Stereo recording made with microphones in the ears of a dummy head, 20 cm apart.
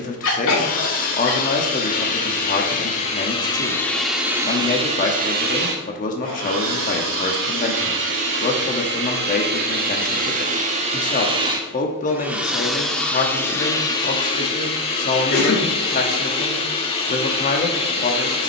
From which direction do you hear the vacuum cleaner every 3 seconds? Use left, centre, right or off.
left, centre, right, right, centre, left.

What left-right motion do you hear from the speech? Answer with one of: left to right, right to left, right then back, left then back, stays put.
stays put.